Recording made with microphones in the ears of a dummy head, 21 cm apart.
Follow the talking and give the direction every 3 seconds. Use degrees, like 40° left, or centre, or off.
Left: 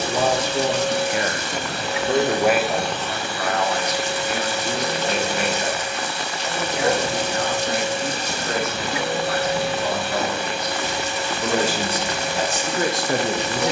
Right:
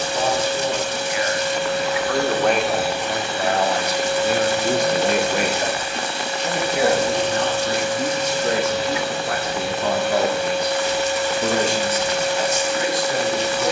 30° left, 30° right, 60° right, 30° right, 40° left.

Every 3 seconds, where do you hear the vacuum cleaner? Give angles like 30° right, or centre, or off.
40° left, 30° right, 10° left, 60° left, 60° left.